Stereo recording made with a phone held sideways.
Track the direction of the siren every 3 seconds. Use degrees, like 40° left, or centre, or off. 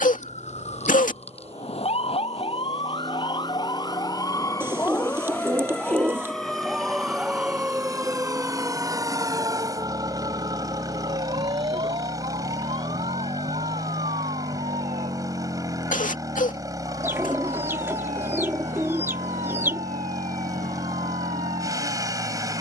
50° left, 20° left, 10° right, 30° right, 50° right, 60° right, 60° right, 60° right.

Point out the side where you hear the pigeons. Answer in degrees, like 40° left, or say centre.
20° right.